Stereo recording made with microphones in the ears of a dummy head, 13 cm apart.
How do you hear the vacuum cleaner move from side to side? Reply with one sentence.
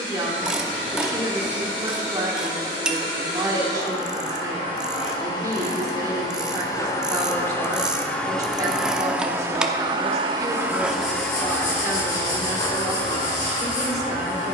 In this clip you hear the vacuum cleaner go right and come back.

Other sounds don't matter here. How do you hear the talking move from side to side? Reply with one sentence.
You can hear the talking stay put.